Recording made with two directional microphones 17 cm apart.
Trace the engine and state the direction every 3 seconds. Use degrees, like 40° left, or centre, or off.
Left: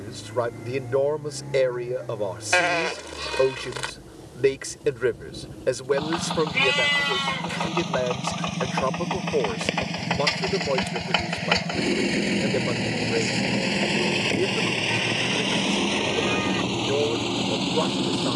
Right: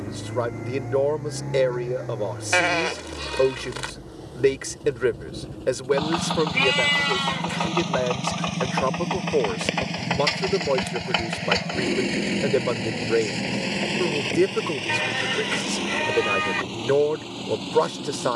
60° right, 50° right, 40° right, 10° right, 20° left, 50° left.